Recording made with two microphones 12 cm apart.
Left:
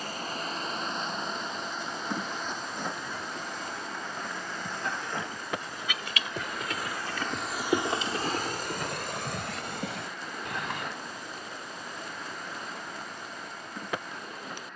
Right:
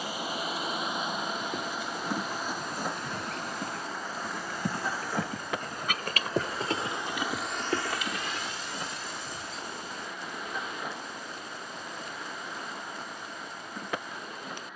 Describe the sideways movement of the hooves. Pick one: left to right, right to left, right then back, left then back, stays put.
right to left.